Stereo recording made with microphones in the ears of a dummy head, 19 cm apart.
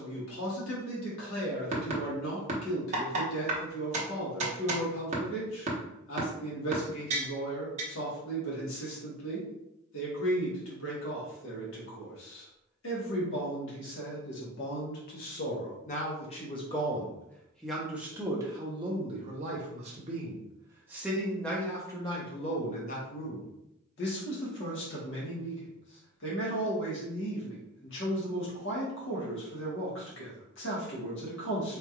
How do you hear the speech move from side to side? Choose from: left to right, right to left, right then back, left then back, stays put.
right then back.